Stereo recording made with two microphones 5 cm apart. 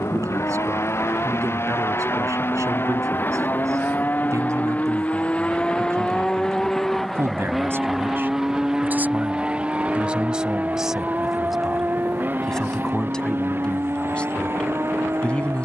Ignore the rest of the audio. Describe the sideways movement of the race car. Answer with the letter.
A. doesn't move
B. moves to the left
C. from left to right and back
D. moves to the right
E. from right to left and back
D.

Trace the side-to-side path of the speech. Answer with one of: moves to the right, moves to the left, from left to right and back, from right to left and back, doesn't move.
moves to the left.